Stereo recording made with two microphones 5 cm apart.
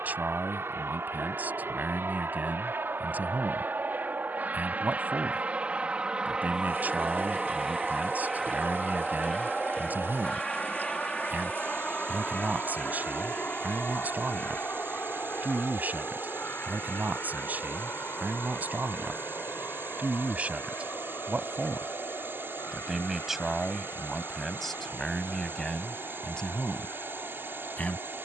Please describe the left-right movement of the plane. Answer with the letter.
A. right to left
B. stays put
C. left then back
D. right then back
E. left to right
A.